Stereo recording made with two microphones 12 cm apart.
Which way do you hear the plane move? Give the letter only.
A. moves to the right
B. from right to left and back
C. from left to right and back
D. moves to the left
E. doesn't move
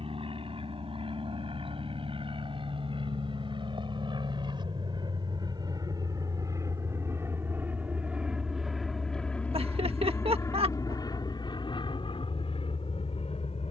D.